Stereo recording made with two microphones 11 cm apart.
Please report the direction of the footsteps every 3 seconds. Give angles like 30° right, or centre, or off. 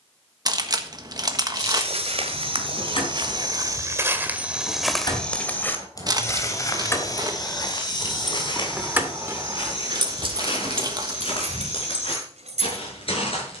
60° right, 10° right, 40° left, 50° left, 60° left.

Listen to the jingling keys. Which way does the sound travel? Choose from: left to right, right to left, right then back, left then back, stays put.
left to right.